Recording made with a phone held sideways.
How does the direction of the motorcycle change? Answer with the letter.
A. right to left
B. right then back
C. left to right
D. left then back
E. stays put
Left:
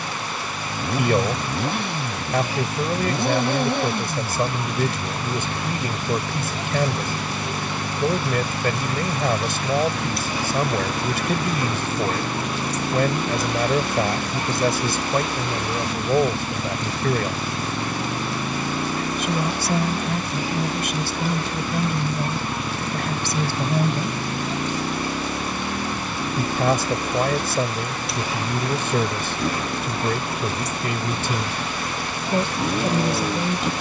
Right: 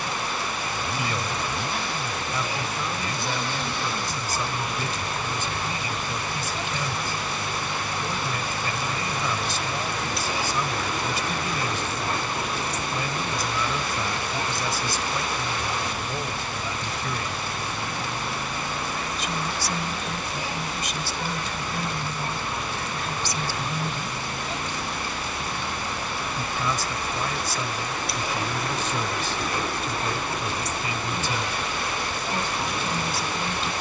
E.